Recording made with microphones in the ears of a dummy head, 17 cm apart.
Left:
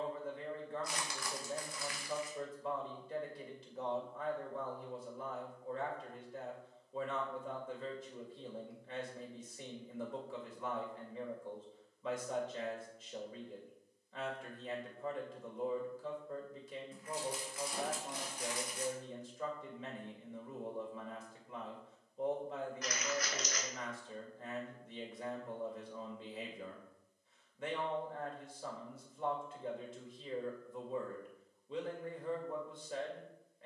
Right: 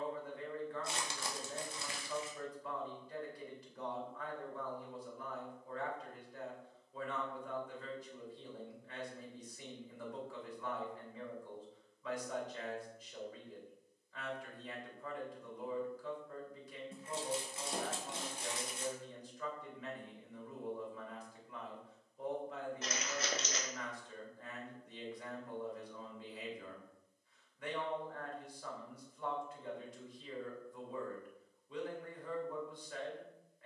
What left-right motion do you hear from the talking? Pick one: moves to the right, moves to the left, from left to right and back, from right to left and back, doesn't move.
doesn't move.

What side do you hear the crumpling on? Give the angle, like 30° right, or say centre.
20° right.